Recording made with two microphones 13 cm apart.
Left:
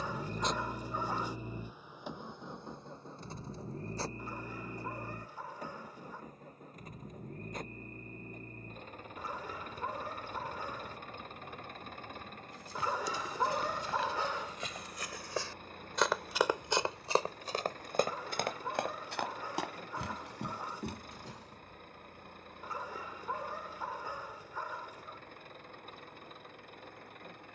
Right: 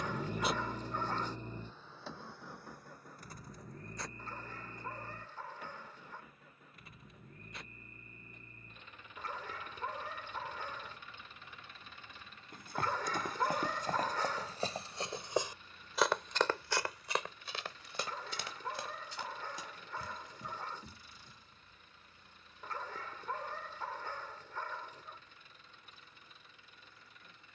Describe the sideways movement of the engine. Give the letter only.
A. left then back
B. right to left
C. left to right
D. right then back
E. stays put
B.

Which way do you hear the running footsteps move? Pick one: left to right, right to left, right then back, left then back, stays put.
right to left.